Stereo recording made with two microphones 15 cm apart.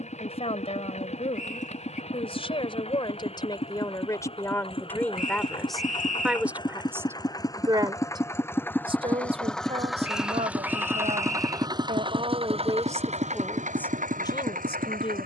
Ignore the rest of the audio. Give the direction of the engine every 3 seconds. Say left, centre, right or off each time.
left, left, left, centre, right.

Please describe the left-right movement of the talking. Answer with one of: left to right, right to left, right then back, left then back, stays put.
right then back.